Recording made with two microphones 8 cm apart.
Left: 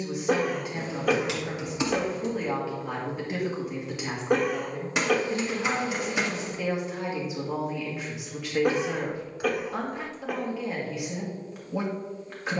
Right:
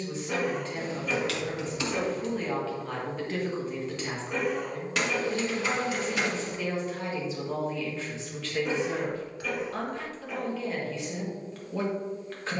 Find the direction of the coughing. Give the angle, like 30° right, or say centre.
70° left.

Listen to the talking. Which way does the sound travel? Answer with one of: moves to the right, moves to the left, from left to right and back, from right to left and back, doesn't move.
doesn't move.